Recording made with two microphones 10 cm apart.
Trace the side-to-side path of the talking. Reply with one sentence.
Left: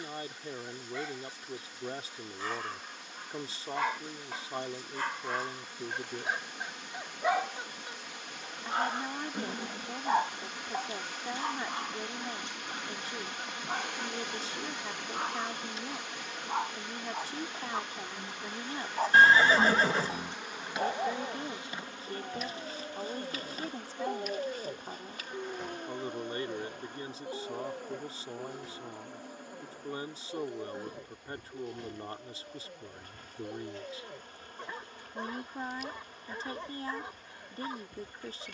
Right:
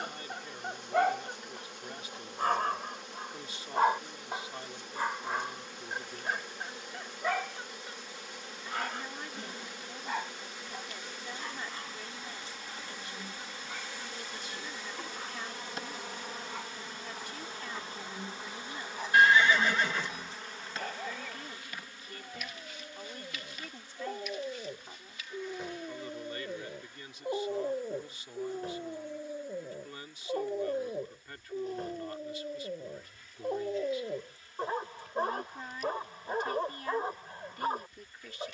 In this clip you hear the talking stay in one place.